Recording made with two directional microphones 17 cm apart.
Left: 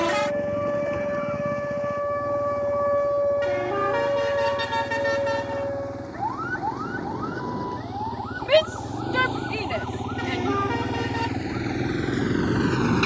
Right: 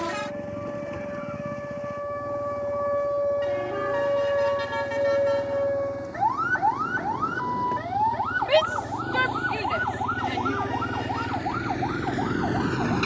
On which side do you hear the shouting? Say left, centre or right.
centre.